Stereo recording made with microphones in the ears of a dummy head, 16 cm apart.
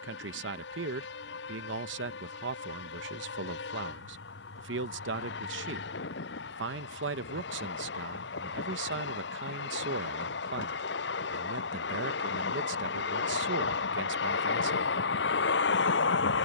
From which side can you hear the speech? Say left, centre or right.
right.